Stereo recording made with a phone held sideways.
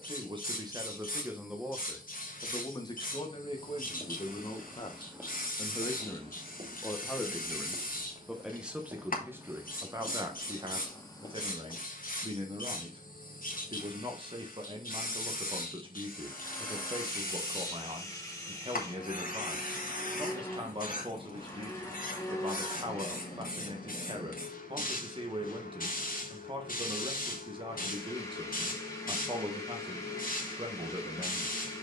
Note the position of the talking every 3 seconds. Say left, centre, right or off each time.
centre, left, centre, right, right, right, right, right, right, right, right.